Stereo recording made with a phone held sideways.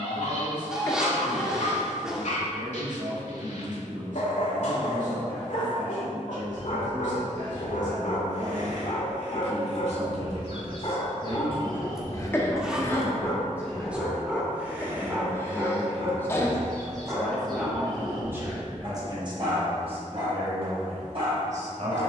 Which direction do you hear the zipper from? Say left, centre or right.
centre.